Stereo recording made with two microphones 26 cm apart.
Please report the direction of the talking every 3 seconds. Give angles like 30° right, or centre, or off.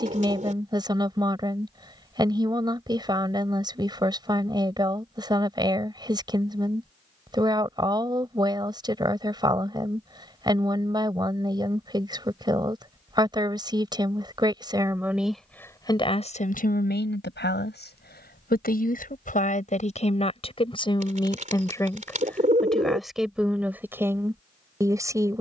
20° right, 20° right, 20° right, 20° right, 20° right, 30° left, 30° left, centre, 10° right.